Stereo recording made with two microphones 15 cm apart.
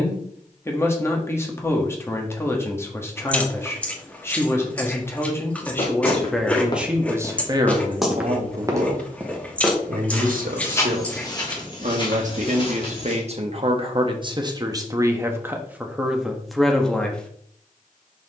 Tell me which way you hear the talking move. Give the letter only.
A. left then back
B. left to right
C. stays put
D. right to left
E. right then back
E.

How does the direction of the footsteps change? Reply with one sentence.
You can hear the footsteps go right and come back.